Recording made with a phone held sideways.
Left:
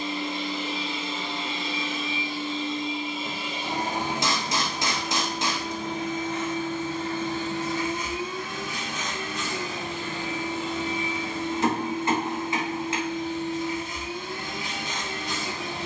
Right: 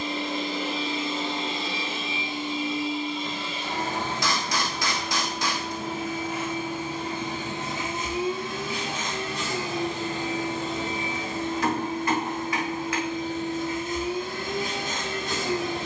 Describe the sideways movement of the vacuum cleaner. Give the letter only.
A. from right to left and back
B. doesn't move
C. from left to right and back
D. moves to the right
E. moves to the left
A.